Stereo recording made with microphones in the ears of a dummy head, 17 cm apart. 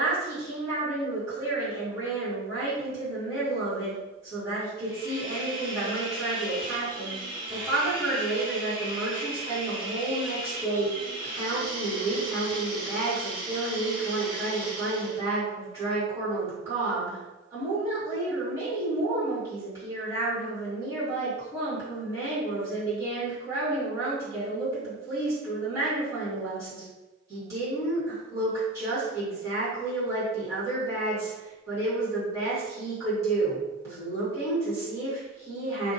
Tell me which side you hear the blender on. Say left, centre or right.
left.